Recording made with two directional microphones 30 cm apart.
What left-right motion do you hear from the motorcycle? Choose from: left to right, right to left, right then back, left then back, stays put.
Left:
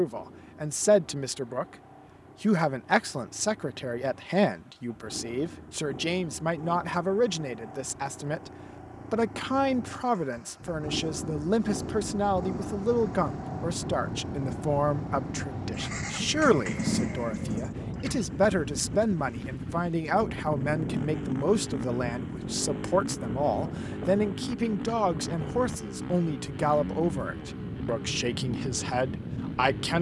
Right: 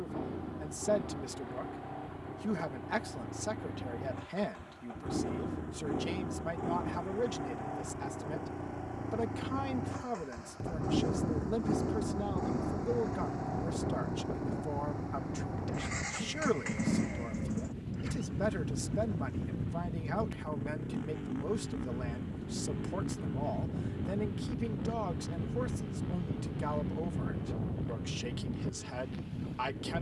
right to left.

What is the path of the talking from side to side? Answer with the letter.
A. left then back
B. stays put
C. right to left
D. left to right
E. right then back
B.